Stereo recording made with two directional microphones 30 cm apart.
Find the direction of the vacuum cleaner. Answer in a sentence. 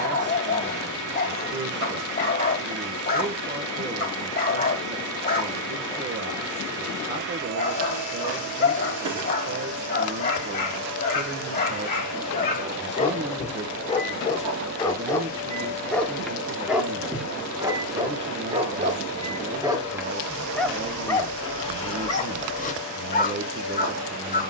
In this clip you hear the vacuum cleaner on the right.